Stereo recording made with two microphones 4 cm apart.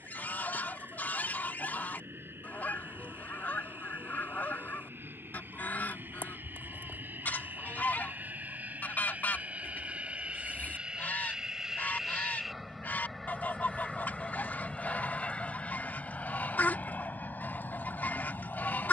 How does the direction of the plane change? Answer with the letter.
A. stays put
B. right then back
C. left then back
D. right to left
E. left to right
D.